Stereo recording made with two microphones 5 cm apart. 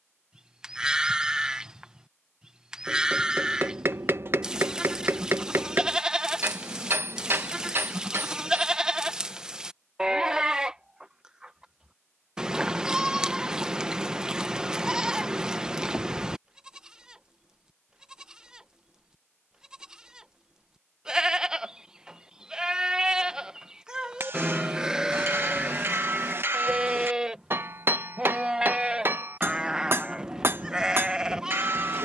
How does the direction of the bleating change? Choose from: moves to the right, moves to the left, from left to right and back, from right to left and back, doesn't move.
doesn't move.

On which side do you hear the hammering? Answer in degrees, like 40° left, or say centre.
50° right.